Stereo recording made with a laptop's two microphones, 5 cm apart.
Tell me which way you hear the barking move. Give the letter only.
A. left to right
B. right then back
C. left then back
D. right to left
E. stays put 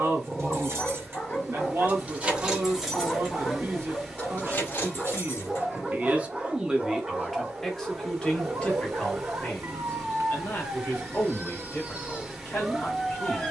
B.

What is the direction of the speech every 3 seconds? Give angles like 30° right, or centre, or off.
60° right, 50° right, centre, 40° left, 50° left.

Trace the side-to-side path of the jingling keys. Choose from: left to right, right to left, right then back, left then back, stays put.
right to left.